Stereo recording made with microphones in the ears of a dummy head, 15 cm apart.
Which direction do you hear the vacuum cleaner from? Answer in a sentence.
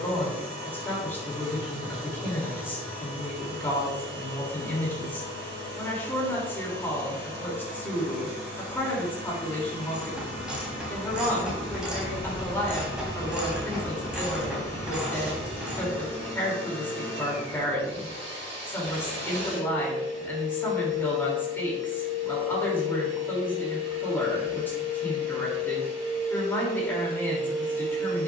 You can hear the vacuum cleaner on the right.